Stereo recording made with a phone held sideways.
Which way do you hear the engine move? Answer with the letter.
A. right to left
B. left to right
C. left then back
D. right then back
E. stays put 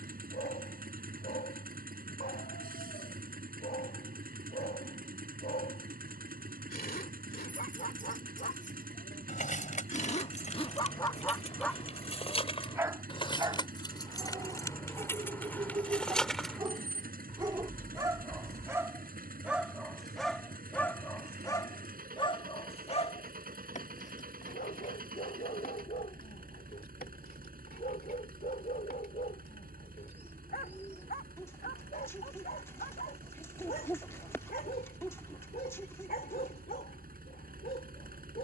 E.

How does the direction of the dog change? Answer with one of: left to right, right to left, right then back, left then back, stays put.
right then back.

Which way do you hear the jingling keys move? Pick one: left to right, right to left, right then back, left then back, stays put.
left to right.